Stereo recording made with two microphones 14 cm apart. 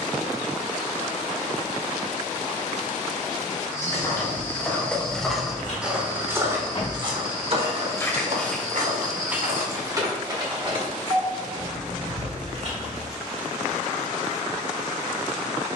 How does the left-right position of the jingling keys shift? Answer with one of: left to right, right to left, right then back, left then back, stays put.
left to right.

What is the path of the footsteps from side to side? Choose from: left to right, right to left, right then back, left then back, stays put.
left to right.